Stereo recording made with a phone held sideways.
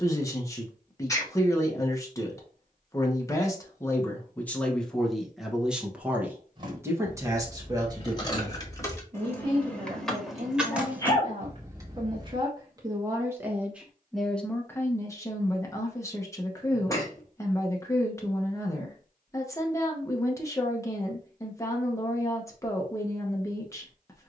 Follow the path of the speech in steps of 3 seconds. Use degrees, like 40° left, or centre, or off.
20° left, 10° left, 20° right, 40° right, 10° right, 20° left, 20° left, 20° left.